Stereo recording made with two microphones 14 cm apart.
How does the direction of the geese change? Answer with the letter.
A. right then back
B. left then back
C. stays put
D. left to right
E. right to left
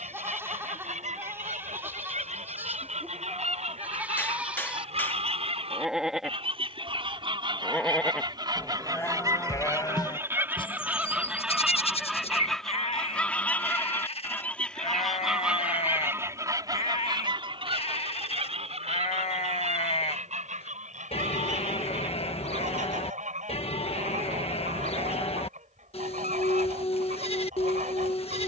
B.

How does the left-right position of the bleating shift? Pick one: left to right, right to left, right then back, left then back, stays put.
right to left.